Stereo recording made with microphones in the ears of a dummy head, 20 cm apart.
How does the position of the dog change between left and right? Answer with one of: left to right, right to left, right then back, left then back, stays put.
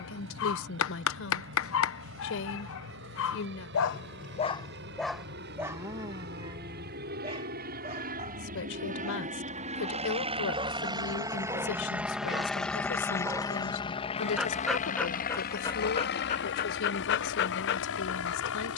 right then back.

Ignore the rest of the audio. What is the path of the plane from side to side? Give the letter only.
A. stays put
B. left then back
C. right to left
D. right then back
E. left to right
C.